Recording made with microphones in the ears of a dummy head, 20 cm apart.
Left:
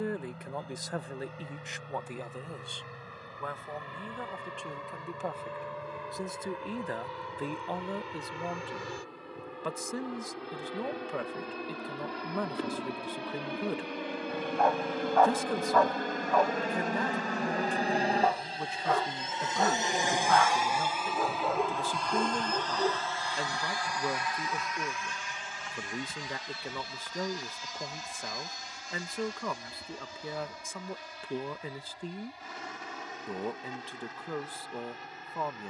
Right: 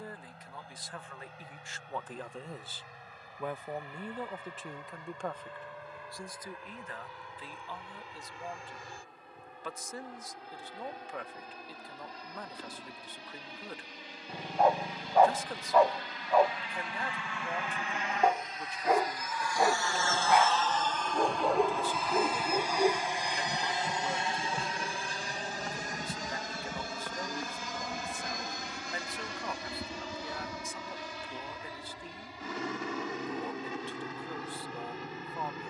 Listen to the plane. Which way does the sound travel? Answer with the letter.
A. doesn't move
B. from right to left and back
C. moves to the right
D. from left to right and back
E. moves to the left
C.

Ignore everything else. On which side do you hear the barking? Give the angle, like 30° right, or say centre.
10° right.